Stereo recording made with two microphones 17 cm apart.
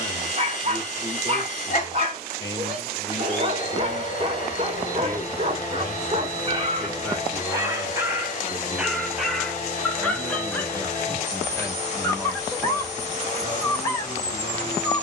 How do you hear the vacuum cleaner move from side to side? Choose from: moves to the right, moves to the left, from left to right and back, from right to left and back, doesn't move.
doesn't move.